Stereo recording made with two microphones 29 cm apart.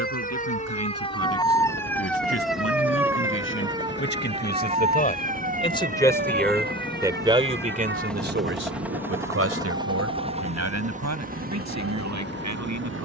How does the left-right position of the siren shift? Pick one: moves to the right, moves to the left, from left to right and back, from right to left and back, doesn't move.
moves to the right.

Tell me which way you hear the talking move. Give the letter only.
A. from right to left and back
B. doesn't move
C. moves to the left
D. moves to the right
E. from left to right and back
D.